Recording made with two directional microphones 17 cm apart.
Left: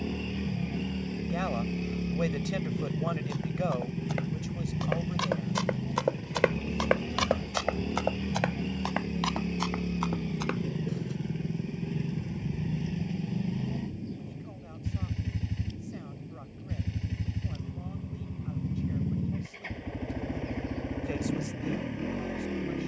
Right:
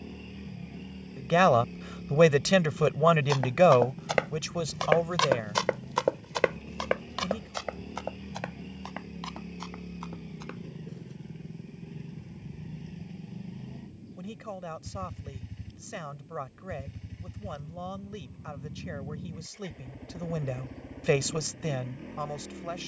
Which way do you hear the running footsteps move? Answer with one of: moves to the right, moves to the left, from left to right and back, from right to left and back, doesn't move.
moves to the left.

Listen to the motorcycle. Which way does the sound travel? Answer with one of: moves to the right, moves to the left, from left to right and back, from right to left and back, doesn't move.
doesn't move.